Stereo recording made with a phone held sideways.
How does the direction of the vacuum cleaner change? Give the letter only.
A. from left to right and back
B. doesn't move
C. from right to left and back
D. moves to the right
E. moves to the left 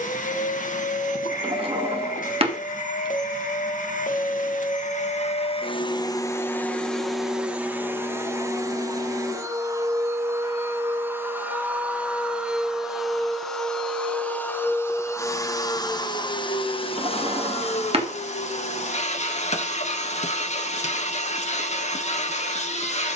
A.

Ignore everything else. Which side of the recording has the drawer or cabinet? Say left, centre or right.
right.